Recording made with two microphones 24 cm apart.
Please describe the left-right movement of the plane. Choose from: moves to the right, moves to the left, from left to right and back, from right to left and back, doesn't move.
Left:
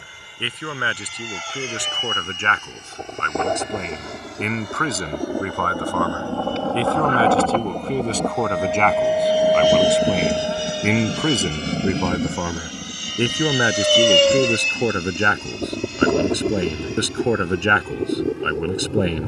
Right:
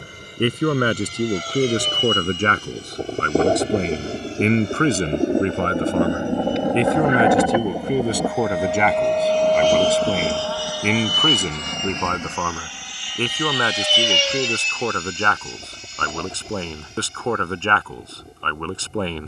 moves to the left.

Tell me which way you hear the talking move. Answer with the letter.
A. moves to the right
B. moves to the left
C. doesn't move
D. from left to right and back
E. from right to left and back
B.